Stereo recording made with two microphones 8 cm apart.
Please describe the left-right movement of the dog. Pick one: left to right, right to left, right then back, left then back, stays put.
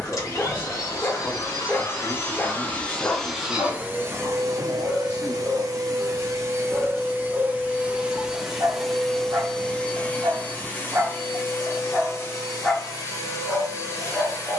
right then back.